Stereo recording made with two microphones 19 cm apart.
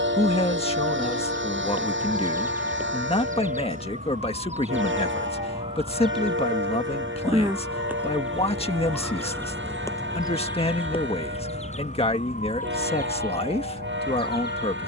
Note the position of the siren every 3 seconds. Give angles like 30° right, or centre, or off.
50° right, 40° right, 10° right, 20° left, 50° left.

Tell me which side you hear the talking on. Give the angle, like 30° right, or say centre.
30° left.